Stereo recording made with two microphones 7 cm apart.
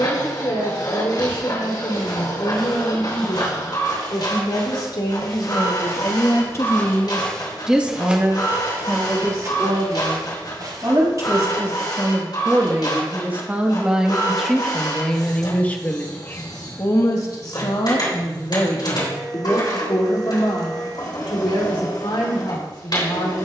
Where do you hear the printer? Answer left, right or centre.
left.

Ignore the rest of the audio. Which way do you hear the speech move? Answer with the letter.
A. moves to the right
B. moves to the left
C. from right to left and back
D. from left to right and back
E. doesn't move
D.